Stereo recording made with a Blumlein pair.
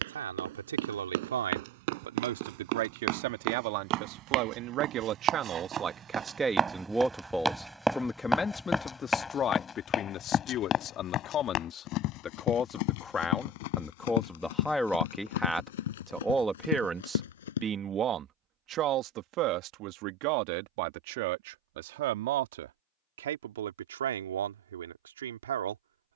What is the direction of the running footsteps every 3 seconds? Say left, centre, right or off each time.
right, right, centre, left, left, left, off, off, off.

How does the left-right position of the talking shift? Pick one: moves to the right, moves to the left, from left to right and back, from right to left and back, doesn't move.
from right to left and back.